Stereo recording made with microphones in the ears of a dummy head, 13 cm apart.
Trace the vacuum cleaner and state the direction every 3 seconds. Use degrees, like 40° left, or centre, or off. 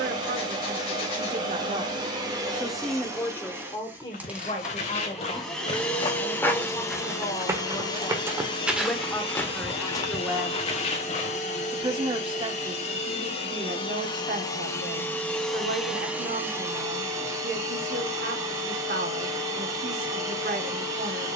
30° right, 10° right, 20° left, 50° left, 40° left, 10° right, 20° right.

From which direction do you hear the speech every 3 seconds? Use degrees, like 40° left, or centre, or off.
40° right, 30° left, 20° left, 10° right, 50° right, 60° right, 60° right.